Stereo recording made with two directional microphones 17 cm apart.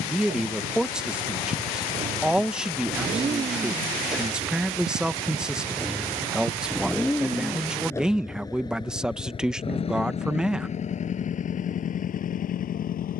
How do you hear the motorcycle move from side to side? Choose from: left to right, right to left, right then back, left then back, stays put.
right to left.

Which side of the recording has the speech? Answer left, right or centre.
centre.